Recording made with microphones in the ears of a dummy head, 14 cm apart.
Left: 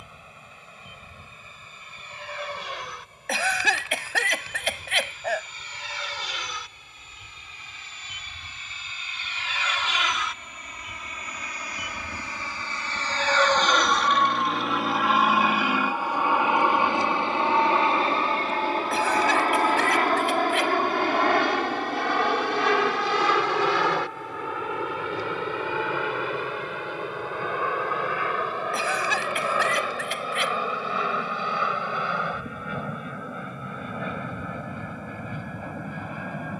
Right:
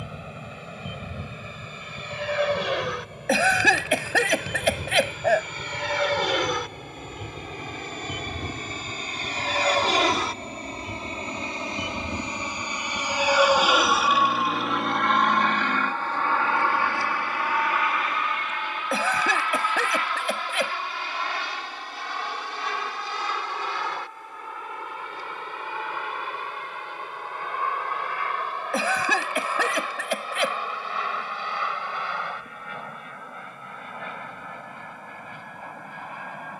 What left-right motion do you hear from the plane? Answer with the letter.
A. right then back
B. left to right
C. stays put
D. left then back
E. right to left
E.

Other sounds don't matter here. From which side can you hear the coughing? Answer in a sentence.
You can hear the coughing on the right.